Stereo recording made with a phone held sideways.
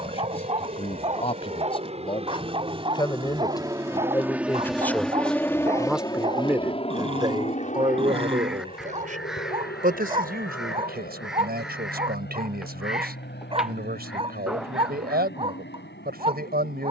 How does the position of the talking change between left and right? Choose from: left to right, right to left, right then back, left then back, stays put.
left to right.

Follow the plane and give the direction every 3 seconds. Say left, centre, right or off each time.
right, centre, left, left, left, left.